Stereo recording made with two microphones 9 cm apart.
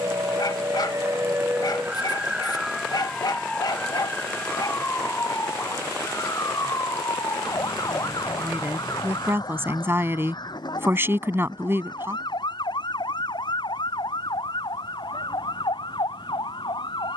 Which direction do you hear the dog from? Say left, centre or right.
left.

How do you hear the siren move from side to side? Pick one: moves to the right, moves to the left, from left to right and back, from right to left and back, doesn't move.
moves to the left.